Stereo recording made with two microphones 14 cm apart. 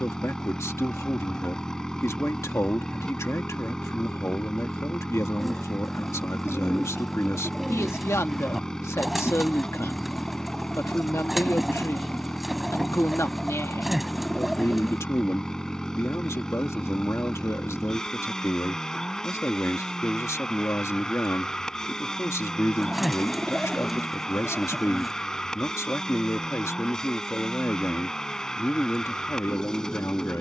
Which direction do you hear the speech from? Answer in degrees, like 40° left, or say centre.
20° left.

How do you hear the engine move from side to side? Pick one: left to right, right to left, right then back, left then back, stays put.
stays put.